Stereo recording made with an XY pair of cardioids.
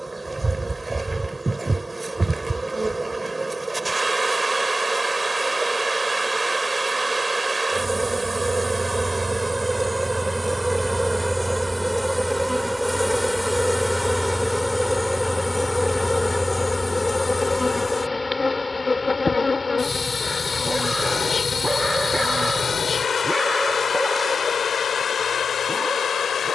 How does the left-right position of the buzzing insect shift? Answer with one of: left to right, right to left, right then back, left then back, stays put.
right to left.